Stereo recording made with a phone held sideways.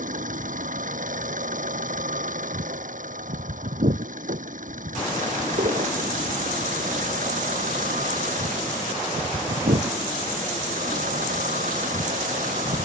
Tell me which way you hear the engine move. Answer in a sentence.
In this clip you hear the engine stay put.